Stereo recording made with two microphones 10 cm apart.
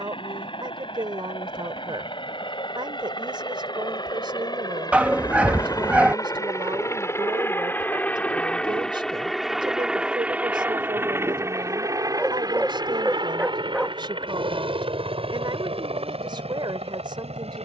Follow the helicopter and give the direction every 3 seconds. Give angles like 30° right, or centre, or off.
60° left, 40° left, 20° left, 10° right, 40° right, 60° right.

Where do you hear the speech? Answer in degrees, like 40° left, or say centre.
50° right.